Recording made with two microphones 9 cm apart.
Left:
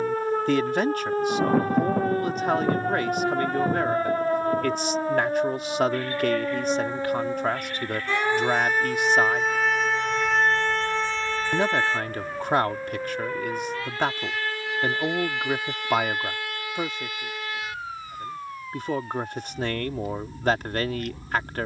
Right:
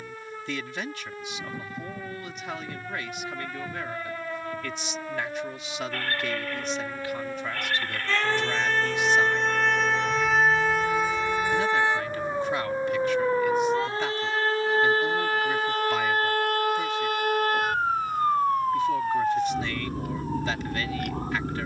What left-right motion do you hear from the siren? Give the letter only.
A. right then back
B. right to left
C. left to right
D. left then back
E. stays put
C.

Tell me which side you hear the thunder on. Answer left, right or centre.
left.